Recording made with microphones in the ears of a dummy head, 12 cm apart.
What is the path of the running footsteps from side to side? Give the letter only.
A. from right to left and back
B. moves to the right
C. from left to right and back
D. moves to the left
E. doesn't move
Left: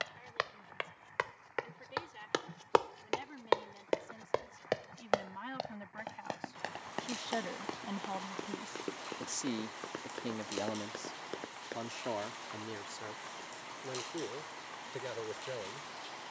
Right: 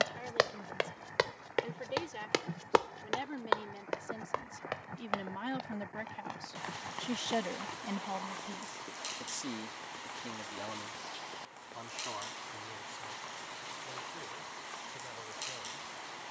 D.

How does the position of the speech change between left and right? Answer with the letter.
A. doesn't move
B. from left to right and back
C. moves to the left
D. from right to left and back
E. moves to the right
C.